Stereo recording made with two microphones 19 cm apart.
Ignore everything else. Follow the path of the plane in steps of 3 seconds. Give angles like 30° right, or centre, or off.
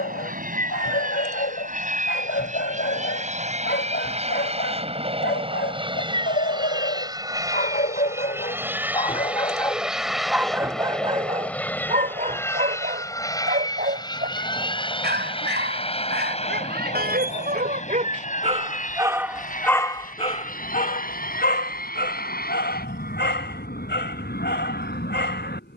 50° right, 40° right, 20° right, centre, 20° left, 30° left, 40° left, 50° left, 50° left.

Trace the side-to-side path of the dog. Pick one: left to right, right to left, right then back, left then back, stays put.
right then back.